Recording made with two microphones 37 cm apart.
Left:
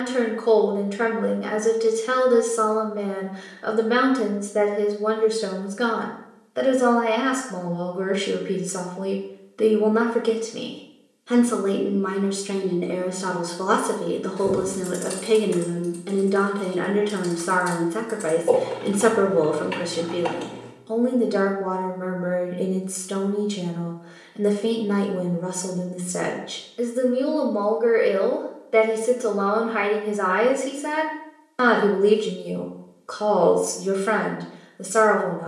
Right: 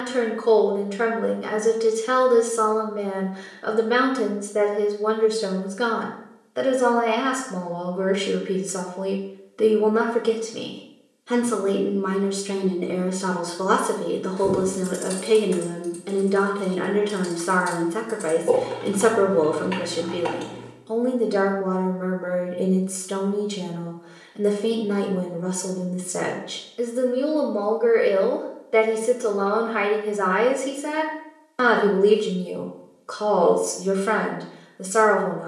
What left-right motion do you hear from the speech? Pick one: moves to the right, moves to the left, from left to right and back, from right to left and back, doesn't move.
doesn't move.